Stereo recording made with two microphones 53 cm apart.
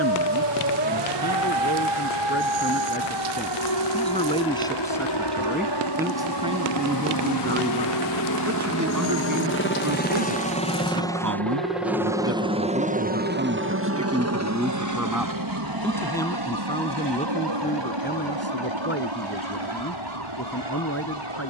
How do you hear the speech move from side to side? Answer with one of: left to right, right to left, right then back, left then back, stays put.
right then back.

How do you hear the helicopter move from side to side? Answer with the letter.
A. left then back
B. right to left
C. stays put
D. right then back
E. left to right
E.